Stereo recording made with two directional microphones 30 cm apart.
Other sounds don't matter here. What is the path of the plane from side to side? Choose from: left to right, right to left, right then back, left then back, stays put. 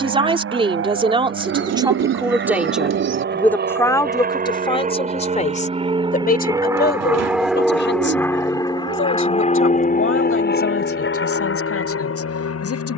right to left.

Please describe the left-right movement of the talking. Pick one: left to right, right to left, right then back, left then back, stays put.
right to left.